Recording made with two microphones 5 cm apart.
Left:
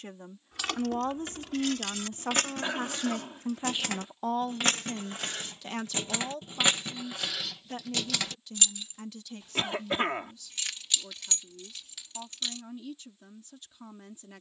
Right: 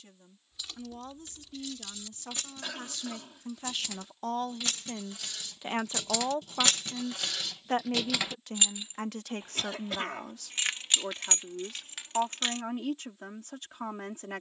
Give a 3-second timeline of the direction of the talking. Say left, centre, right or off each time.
left, centre, right, right, right.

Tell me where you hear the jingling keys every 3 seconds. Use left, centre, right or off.
left, left, centre, right, right.